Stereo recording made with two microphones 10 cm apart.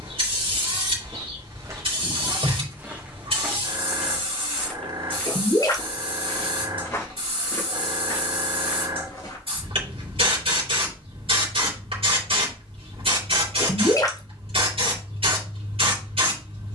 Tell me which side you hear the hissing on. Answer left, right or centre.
right.